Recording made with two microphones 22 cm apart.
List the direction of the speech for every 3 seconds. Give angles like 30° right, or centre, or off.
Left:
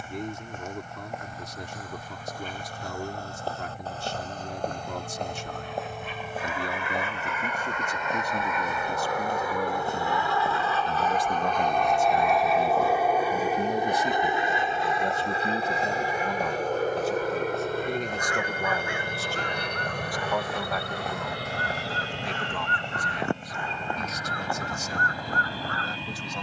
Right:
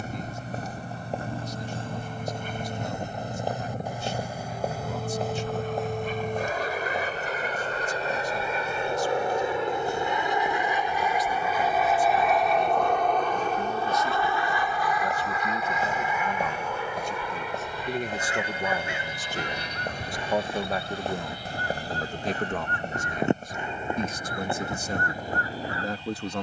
70° left, 60° left, 60° left, 50° left, 30° left, 10° left, 20° right, 40° right, 50° right.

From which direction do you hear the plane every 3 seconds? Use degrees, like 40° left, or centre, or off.
60° right, 50° right, 40° right, 20° right, 10° left, 30° left, 50° left, 60° left, 70° left.